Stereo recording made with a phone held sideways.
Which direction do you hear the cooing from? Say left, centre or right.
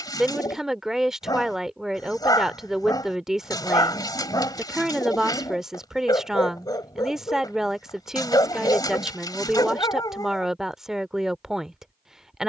left.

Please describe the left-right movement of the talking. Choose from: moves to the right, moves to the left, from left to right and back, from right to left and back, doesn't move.
doesn't move.